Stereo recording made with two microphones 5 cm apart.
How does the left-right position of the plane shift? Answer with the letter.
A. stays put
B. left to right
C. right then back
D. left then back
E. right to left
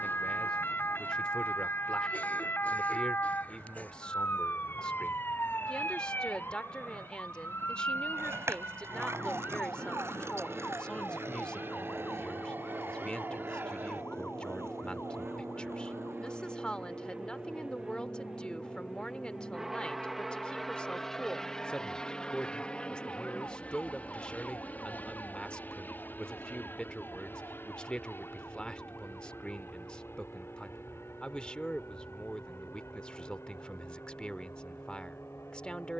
E.